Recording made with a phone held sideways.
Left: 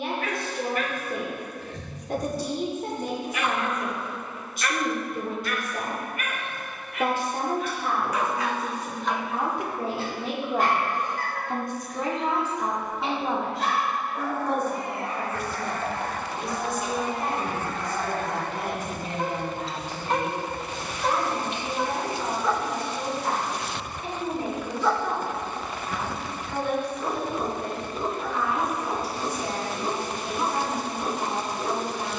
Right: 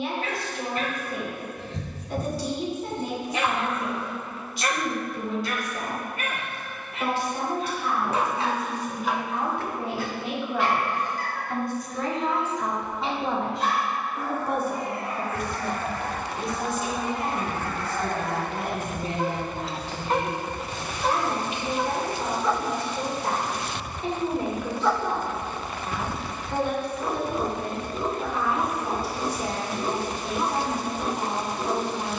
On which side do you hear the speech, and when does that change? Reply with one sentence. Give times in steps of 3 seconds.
You can hear the speech on the left from 0 s, in the centre from 12 s and on the right from 15 s.